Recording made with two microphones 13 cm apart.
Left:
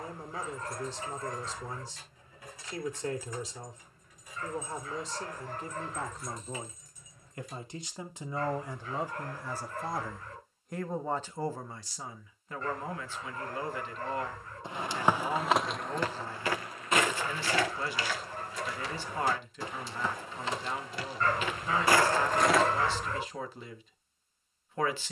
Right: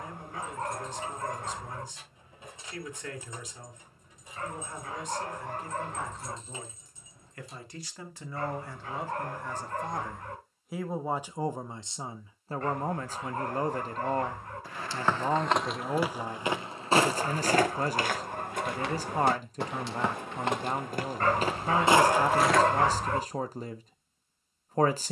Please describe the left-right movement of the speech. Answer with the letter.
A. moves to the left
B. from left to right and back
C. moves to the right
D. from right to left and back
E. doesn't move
C.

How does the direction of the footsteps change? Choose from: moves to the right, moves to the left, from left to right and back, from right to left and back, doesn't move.
from left to right and back.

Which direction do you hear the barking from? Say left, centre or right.
right.